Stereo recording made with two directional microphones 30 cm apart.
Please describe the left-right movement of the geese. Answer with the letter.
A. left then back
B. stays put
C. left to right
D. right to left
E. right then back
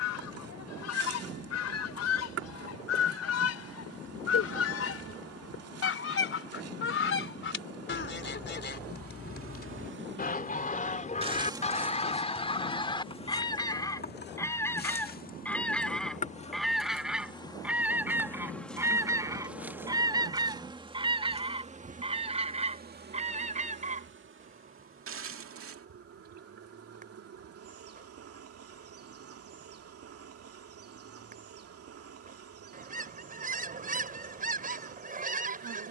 C.